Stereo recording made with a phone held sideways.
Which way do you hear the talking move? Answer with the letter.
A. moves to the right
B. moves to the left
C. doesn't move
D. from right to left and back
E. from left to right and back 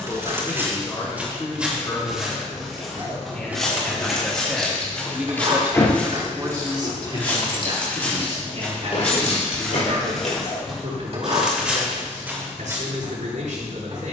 A.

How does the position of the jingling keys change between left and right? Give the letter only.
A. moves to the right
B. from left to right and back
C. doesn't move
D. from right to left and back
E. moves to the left
E.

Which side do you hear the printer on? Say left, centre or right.
right.